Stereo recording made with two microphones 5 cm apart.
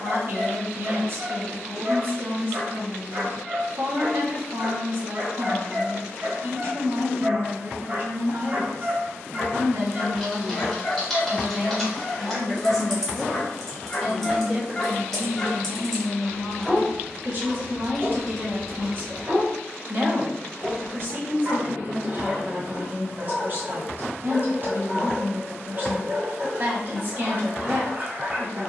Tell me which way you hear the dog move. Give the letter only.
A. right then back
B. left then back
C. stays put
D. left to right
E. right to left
B.